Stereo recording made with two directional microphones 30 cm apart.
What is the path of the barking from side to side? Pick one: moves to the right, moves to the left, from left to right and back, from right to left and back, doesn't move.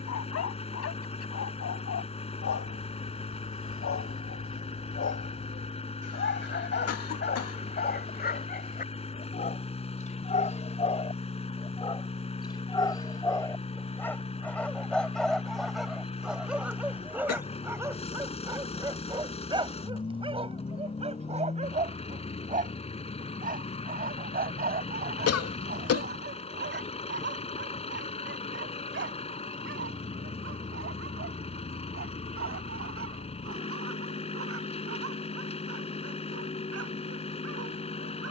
moves to the right.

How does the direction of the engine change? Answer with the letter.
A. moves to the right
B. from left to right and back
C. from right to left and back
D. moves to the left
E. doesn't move
E.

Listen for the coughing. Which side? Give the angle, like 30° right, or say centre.
50° left.